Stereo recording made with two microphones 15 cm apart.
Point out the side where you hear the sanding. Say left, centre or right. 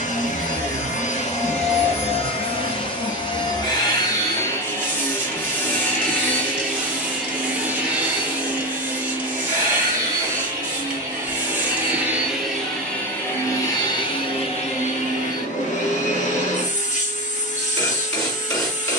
centre.